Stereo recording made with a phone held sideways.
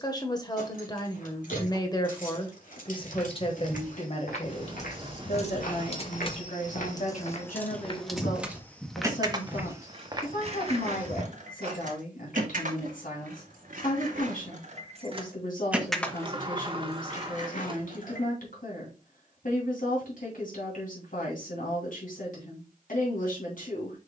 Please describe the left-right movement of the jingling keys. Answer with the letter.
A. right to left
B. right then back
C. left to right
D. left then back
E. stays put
B.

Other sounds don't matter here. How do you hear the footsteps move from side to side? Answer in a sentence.
You can hear the footsteps travel towards the right.